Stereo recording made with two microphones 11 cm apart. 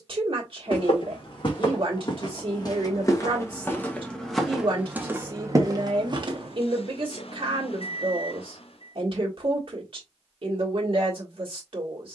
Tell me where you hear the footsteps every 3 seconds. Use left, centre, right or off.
left, centre, right, off.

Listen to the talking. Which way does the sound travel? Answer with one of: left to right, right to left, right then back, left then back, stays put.
stays put.